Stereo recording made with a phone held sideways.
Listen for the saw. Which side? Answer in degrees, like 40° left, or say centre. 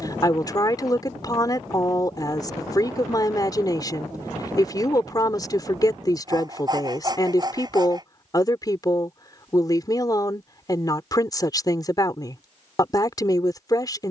30° right.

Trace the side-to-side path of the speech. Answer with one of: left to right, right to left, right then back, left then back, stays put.
stays put.